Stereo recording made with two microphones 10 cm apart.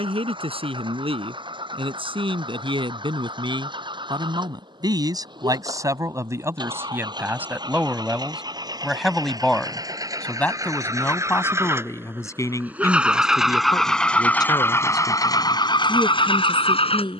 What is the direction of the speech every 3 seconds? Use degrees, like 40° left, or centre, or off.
60° right, 40° right, 20° right, 20° left, 40° left, 50° left.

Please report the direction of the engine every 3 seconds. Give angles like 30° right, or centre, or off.
50° right, 50° right, 40° right, 30° right, centre, 50° left.